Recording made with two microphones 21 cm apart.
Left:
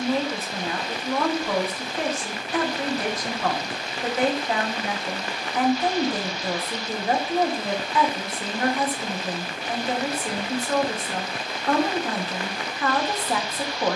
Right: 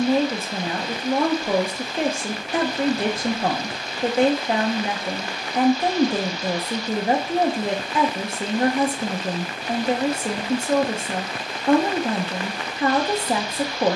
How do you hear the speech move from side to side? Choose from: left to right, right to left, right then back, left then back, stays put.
stays put.